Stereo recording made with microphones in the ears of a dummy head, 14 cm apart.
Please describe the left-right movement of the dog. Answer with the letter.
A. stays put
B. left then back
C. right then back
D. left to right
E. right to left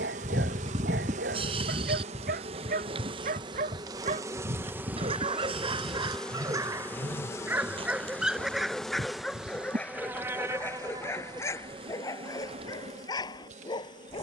E.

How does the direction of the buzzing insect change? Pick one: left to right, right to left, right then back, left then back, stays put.
left then back.